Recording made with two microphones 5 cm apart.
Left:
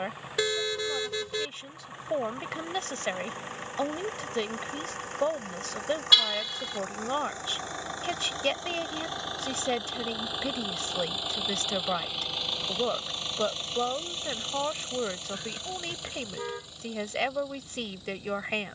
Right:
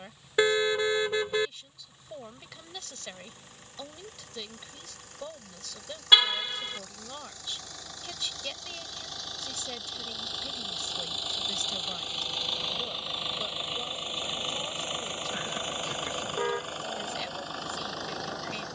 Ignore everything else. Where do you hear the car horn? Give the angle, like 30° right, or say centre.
20° right.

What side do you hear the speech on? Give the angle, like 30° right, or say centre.
50° left.